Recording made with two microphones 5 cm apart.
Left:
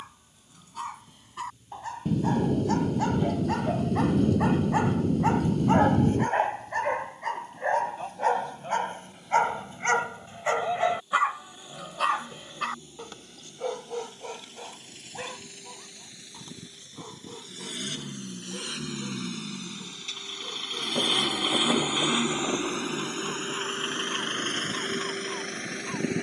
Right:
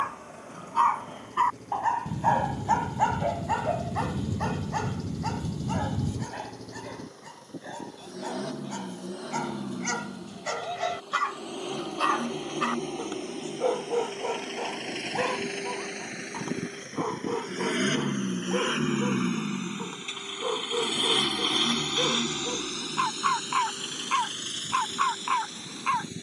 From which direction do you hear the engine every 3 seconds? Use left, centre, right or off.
right, right, right, right, right, right, right, left, left.